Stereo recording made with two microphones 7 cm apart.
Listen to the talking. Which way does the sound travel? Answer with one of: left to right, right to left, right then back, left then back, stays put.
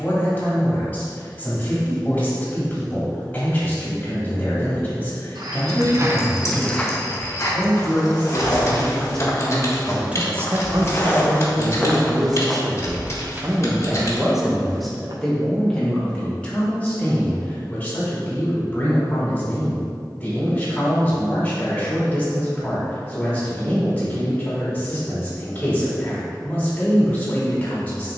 right then back.